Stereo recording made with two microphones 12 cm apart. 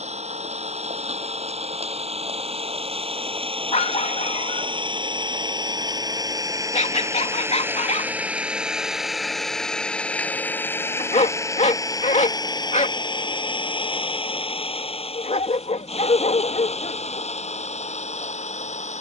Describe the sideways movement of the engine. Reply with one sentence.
You can hear the engine go from the right side to the left.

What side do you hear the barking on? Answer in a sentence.
You can hear the barking on the left.